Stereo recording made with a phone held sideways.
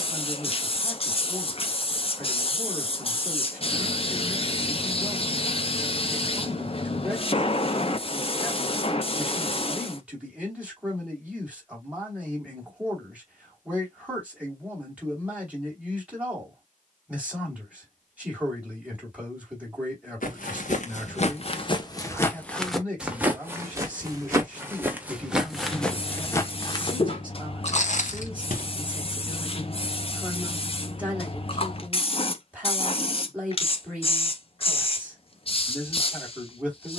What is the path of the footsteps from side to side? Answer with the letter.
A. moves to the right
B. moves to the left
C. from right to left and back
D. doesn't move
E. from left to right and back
E.